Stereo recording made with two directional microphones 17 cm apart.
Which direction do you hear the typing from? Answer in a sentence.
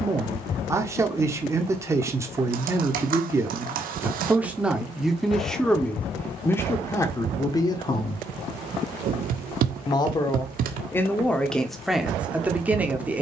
You can hear the typing on the right.